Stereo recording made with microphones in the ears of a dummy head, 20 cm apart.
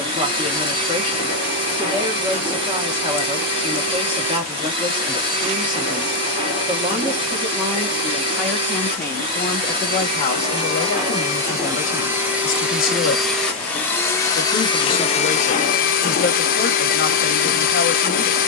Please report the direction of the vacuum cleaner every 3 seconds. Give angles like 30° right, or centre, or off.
20° right, 20° right, 20° right, 20° right, centre, 40° left.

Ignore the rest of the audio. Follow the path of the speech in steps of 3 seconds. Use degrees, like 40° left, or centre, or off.
20° right, 20° right, 10° right, 30° left, 40° left, 40° left.